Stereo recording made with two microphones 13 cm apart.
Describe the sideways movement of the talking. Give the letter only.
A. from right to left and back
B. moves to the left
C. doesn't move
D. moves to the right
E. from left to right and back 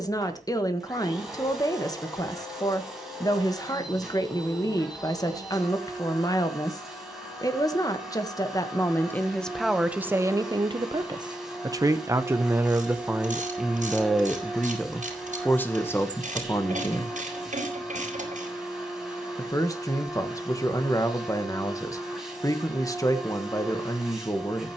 E.